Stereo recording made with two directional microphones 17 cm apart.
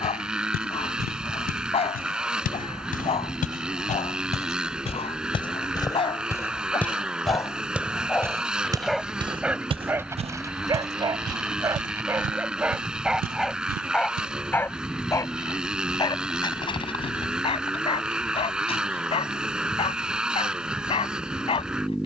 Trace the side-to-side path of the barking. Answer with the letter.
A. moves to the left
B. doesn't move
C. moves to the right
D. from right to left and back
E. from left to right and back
E.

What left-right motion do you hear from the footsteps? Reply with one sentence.
In this clip you hear the footsteps go from the left side to the right.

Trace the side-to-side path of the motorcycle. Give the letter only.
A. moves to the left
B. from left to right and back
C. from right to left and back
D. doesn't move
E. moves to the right
D.